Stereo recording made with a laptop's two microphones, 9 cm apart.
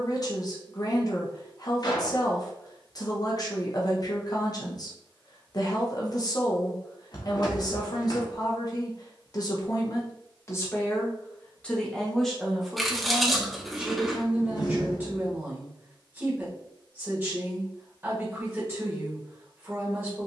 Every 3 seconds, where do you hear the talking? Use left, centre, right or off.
left, left, left, left, centre, right, right.